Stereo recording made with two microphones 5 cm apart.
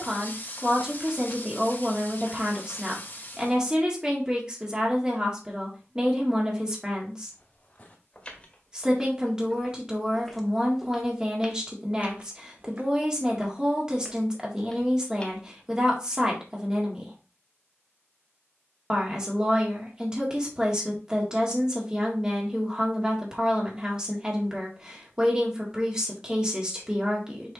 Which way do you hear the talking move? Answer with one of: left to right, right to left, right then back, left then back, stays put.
stays put.